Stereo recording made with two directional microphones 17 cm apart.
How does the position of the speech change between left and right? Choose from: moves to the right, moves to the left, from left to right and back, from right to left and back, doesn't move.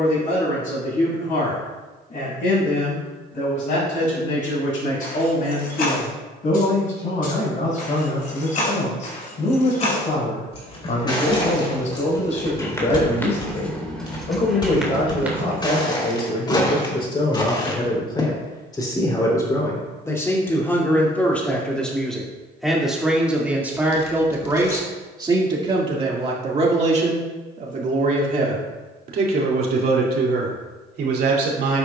moves to the right.